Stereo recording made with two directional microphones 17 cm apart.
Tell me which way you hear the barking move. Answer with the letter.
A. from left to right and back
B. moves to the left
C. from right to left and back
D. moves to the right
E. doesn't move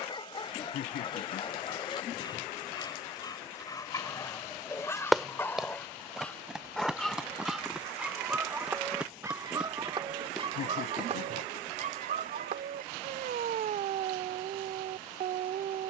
D.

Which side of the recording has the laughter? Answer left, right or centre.
left.